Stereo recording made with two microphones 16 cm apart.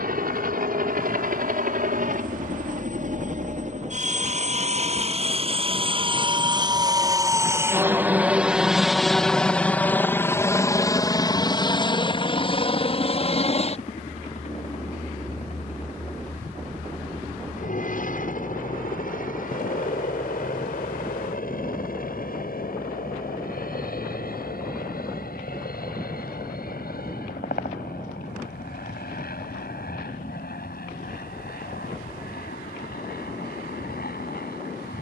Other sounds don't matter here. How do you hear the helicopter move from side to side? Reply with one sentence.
You can hear the helicopter move to the left.